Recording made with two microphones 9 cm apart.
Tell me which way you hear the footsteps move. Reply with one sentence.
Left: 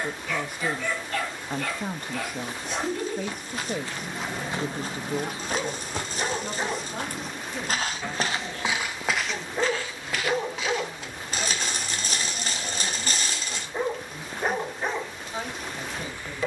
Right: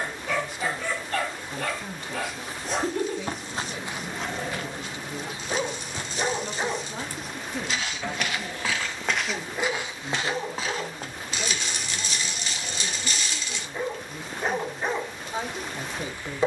In this clip you hear the footsteps move from right to left and back again.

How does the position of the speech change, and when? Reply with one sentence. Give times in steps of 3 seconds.
You can hear the speech on the left from 0 s, in the centre from 6 s and on the right from 9 s.